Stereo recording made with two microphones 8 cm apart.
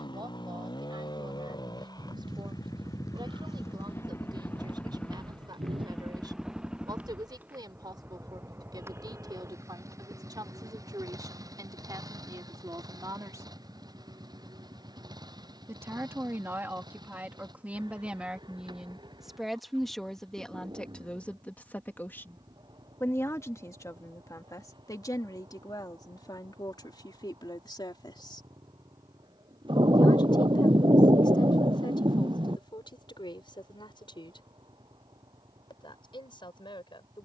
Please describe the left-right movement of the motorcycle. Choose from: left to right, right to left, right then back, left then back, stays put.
left to right.